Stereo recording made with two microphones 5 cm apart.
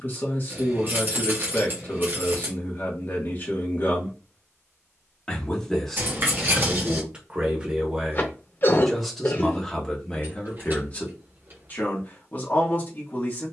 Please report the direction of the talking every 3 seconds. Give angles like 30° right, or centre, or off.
40° left, 30° left, 10° right, 20° left, 40° left.